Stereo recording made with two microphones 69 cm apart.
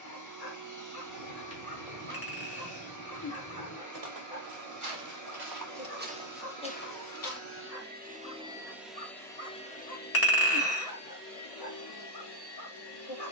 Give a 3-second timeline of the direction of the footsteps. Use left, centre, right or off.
right, right, centre, off, off.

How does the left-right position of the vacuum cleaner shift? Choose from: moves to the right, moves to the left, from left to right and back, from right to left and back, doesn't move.
moves to the left.